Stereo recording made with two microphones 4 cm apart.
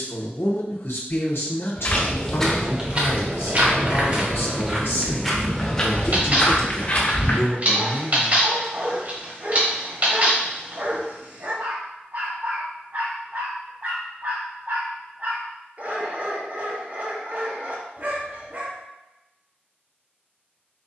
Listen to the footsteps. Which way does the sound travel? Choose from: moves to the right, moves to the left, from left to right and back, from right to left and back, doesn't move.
from left to right and back.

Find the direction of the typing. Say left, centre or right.
right.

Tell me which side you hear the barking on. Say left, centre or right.
right.